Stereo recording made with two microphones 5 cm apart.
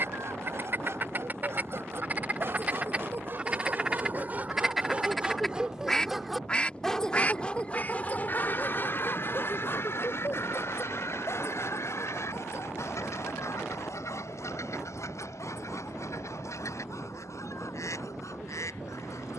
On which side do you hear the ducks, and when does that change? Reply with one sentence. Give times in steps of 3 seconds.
You can hear the ducks on the right from 0 s, in the centre from 3 s and on the left from 6 s.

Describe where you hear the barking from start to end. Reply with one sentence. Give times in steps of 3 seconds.
In this clip you hear the barking on the right from 0 s and on the left from 6 s.